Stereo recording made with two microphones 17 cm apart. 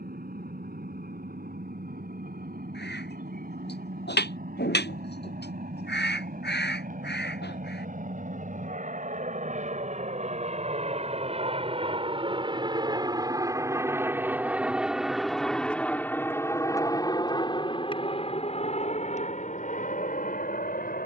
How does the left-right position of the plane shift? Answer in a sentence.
You can hear the plane travel towards the left.